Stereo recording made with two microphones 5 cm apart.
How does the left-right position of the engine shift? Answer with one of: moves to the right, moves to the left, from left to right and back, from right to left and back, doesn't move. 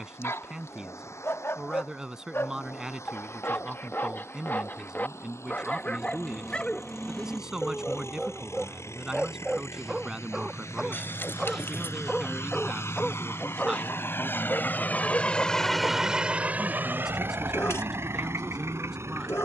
moves to the right.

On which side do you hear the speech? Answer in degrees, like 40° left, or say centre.
10° right.